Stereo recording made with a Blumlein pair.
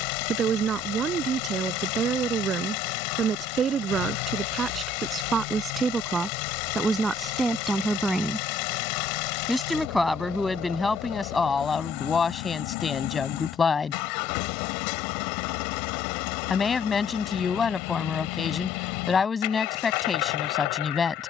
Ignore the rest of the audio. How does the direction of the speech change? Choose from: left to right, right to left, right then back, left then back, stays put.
right to left.